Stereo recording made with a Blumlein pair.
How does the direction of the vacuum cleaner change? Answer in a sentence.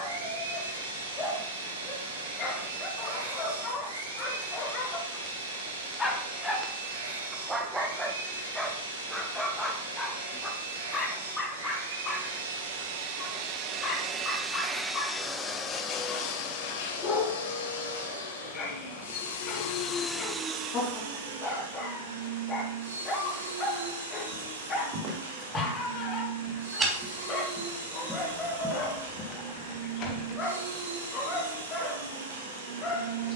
You can hear the vacuum cleaner move from right to left and back again.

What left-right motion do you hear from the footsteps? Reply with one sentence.
In this clip you hear the footsteps go from the right side to the left.